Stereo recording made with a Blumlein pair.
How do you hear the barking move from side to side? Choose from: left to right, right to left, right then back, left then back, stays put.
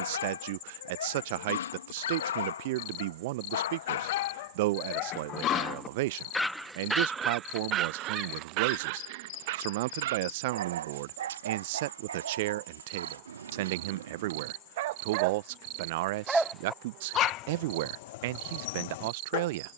right then back.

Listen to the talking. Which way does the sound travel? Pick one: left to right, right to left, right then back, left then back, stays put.
stays put.